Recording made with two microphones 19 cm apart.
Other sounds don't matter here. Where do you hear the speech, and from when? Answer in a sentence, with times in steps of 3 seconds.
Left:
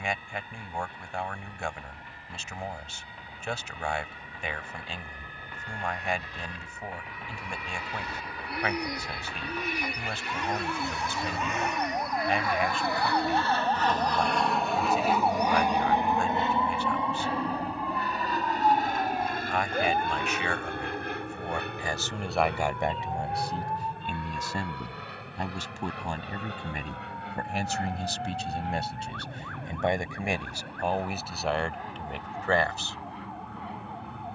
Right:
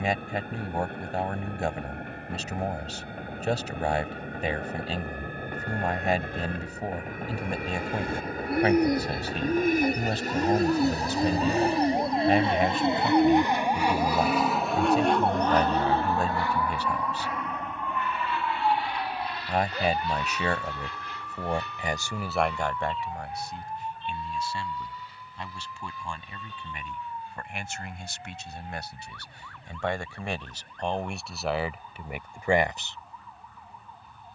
In this clip you hear the speech on the right from 0 s, in the centre from 21 s, on the left from 24 s, in the centre from 30 s and not at all from 33 s.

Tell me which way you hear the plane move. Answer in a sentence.
You can hear the plane move to the left.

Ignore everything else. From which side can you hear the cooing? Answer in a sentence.
In this clip you hear the cooing on the right.